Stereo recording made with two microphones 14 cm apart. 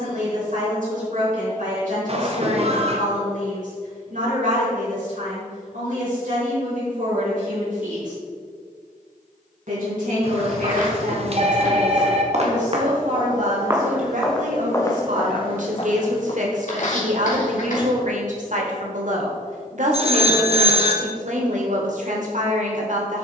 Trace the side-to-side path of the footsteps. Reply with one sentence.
In this clip you hear the footsteps move from right to left.